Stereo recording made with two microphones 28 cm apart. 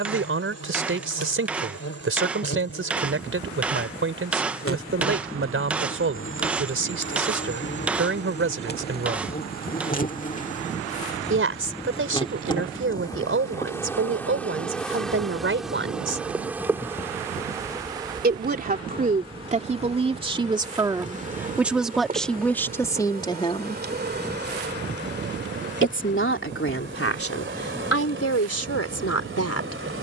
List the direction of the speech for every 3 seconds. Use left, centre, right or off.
right, right, right, right, right, right, right, centre, left, left.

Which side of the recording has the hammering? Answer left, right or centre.
centre.